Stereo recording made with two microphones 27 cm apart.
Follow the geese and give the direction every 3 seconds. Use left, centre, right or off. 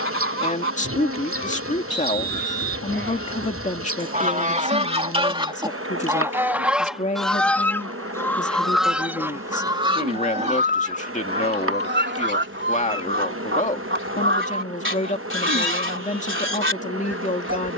right, right, centre, right, right, right.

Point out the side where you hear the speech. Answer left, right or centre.
left.